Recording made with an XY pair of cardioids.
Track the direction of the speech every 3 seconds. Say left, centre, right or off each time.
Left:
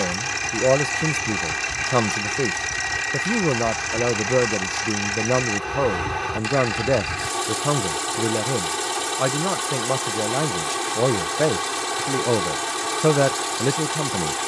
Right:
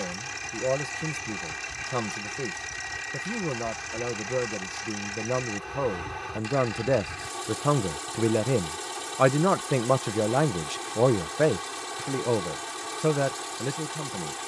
left, left, centre, centre, left.